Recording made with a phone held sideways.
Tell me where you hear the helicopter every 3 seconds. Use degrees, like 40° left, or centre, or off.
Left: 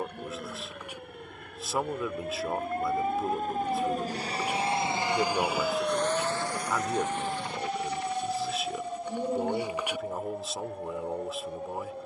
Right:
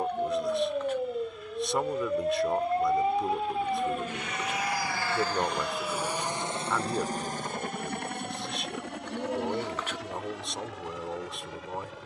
60° left, 30° left, 40° right, 70° right.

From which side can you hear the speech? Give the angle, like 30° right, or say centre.
centre.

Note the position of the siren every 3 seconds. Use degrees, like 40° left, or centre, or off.
50° right, 10° left, 40° left, 50° left.